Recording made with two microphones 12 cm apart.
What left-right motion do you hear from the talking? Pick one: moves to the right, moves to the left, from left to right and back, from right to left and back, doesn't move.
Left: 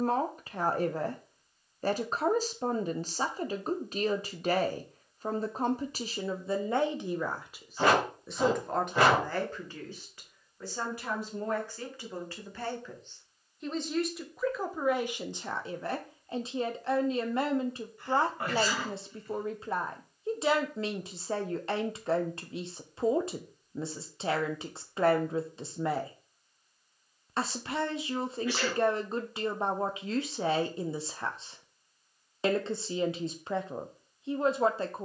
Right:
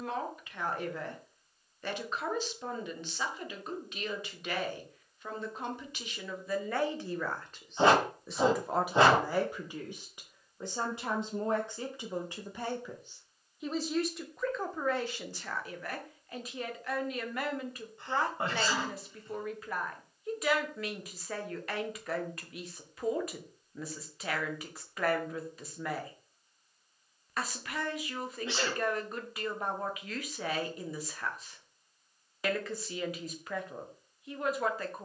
from left to right and back.